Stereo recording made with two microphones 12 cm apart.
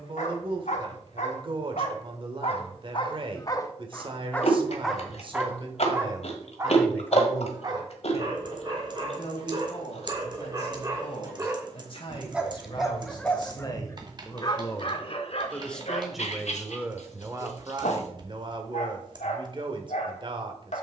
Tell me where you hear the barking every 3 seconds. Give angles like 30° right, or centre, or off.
60° left, 10° left, 30° right, 30° right, 10° left, 60° left, 70° left.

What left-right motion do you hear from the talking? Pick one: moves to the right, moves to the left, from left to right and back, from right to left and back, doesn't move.
from right to left and back.